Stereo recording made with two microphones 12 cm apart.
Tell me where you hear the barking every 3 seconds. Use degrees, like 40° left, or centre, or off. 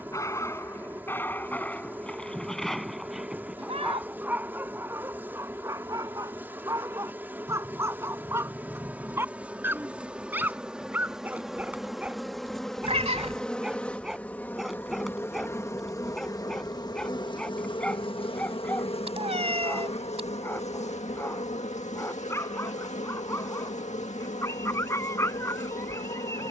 10° left, 20° right, 20° right, 20° right, 10° right, centre, 10° left, 20° left, 20° left.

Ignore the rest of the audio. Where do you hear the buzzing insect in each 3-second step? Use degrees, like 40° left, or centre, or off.
20° right, 20° right, 10° right, 10° right, 10° left, 30° left, 60° left, 80° left, 80° left.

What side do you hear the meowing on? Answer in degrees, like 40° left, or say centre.
60° right.